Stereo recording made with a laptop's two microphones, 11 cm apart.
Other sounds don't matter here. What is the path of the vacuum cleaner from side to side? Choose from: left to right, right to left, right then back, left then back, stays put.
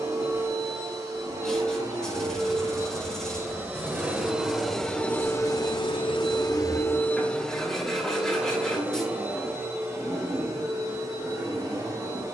left then back.